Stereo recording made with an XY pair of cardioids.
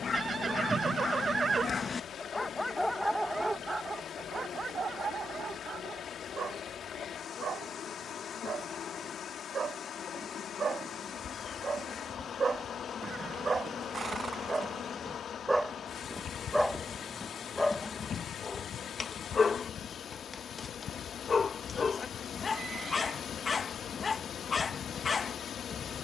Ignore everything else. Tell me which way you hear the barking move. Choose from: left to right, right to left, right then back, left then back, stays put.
right then back.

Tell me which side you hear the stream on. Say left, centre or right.
left.